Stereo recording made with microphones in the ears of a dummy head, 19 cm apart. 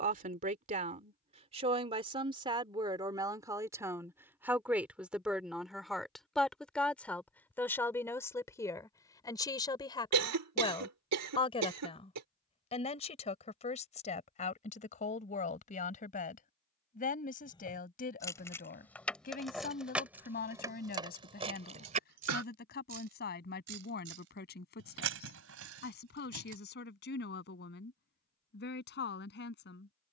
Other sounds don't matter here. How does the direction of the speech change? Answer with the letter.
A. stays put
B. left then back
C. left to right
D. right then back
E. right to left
E.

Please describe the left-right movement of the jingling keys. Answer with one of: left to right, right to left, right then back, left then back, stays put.
left to right.